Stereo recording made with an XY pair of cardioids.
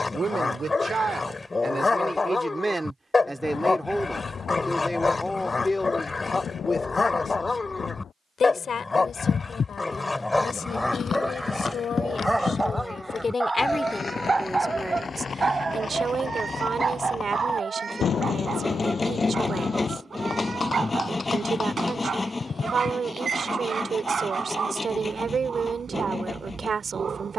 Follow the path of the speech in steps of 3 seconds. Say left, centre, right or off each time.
right, centre, left, left, left, right, right, right, right.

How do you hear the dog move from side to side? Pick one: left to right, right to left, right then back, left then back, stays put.
left to right.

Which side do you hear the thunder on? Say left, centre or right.
left.